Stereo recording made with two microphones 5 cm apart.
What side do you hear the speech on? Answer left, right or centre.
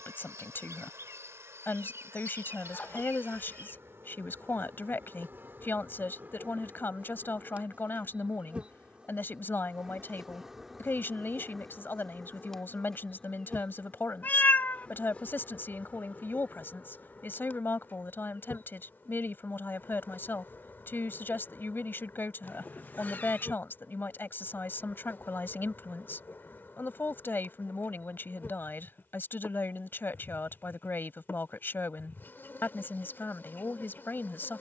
left.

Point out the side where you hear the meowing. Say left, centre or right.
left.